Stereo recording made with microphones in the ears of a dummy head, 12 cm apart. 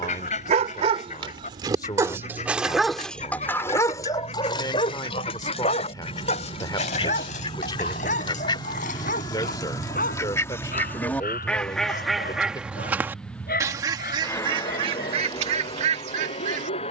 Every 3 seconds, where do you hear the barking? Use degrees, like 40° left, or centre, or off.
30° right, 30° left, 60° left, 70° left, 70° left, 70° left.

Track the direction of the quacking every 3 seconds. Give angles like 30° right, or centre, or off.
50° left, 50° left, 40° left, 20° left, 20° right, 50° right.